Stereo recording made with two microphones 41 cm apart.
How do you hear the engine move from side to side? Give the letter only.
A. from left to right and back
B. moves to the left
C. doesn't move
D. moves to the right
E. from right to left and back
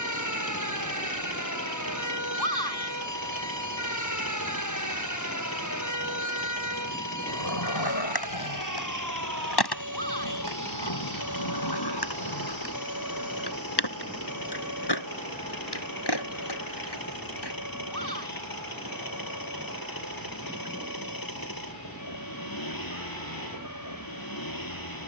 C.